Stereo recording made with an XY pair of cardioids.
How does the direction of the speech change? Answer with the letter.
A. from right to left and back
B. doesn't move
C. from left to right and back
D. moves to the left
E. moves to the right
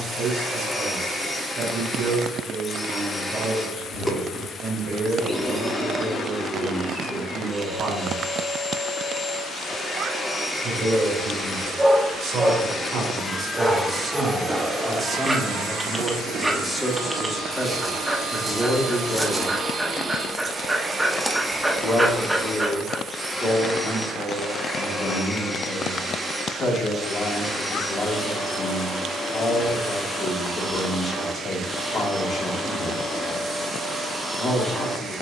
D.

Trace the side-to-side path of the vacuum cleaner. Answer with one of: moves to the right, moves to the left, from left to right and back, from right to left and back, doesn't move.
from left to right and back.